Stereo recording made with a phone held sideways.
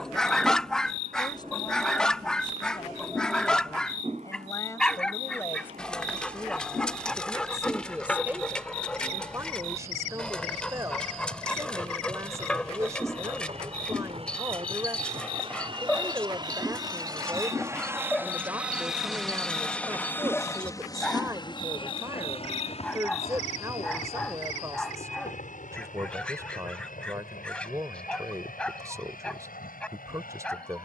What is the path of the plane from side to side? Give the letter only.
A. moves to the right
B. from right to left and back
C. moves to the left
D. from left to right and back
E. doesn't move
C.